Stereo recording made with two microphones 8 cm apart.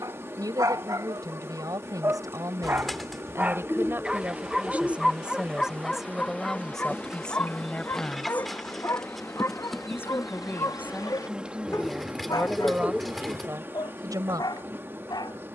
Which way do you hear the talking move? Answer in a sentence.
In this clip you hear the talking move from right to left and back again.